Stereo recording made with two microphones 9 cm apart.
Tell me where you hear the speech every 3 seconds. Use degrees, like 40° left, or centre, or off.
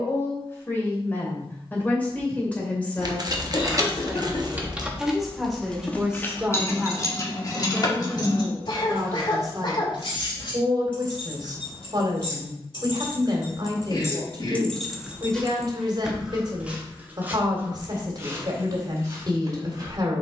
20° left, centre, 20° right, 40° right, 40° right, 40° right, 40° right.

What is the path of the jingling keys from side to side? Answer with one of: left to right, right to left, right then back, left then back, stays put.
left then back.